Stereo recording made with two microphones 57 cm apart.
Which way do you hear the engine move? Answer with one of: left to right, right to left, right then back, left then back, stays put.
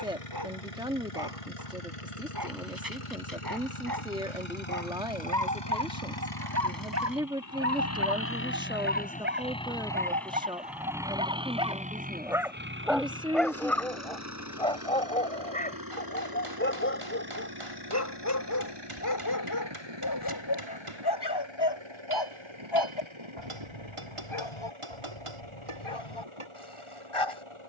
left to right.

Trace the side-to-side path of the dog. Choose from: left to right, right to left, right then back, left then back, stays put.
right to left.